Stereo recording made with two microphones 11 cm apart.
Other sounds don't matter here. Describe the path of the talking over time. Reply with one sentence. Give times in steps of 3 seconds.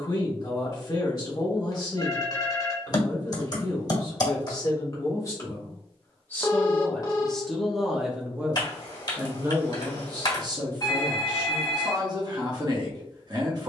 In this clip you hear the talking on the left from 0 s, in the centre from 6 s and on the right from 9 s.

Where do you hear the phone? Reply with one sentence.
In this clip you hear the phone on the left.